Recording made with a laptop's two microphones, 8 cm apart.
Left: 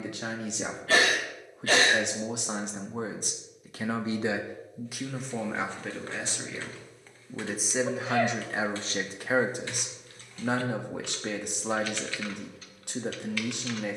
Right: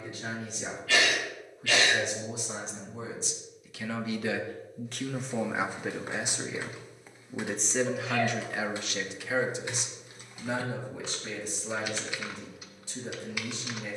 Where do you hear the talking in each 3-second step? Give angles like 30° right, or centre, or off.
70° left, 20° left, 10° left, 50° left, 60° left.